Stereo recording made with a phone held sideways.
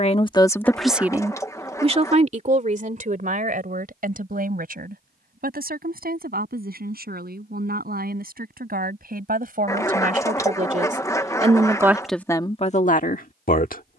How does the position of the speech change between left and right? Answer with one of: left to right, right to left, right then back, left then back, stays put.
right then back.